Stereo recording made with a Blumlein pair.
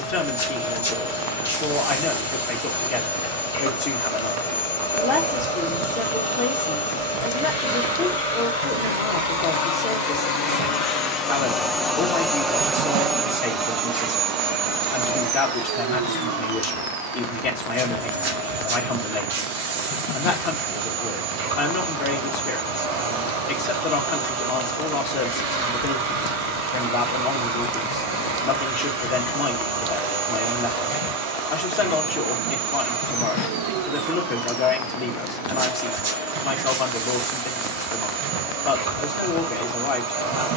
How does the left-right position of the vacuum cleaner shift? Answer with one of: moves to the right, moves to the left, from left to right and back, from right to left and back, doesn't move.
moves to the right.